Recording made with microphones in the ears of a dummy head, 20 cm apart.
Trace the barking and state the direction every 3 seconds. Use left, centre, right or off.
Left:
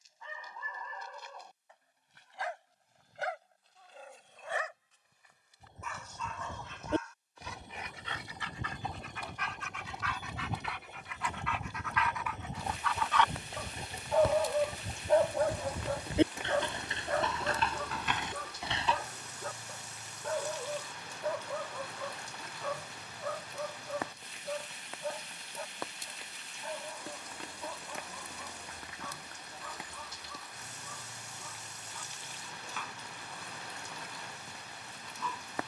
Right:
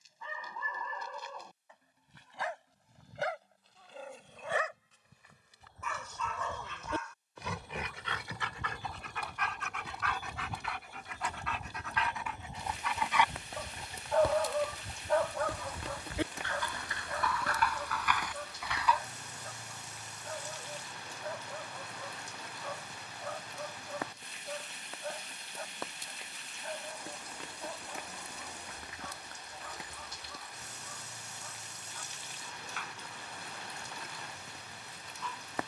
right, right, right, right, centre, left, left, left, left, left, left, left.